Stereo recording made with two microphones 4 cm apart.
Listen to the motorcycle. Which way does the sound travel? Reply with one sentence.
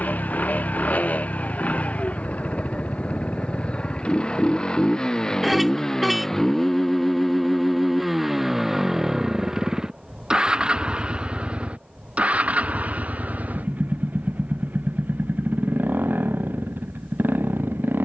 In this clip you hear the motorcycle move from left to right.